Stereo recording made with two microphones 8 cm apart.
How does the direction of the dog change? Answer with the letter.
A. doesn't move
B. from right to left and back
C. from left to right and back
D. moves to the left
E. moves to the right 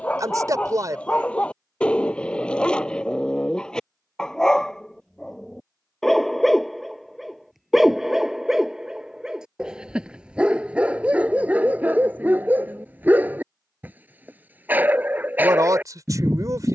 E.